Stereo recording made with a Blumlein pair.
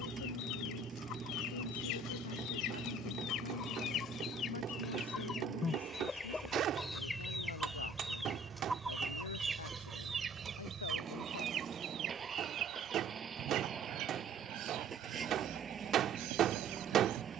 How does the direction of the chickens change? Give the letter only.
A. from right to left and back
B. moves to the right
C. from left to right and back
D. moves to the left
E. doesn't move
B.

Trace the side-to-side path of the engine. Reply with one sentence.
You can hear the engine stay put.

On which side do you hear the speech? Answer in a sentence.
In this clip you hear the speech on the left.